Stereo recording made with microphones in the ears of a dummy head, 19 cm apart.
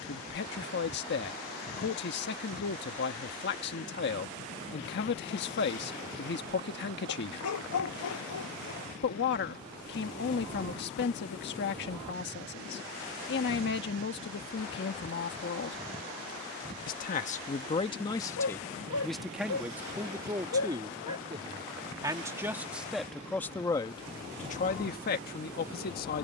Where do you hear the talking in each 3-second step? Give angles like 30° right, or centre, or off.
50° left, 50° left, 50° left, 50° left, 50° left, 40° left, centre, centre, 40° left.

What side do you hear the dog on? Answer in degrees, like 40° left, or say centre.
80° left.